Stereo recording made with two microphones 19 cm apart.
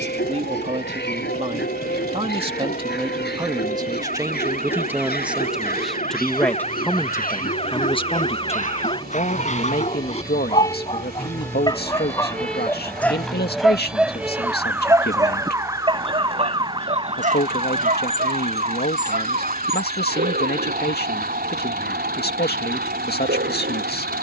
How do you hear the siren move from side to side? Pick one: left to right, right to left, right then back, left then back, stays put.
left to right.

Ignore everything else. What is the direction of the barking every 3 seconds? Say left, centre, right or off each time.
left, left, left, left, centre, right, right, right.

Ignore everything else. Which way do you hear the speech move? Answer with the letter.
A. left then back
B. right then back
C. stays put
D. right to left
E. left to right
D.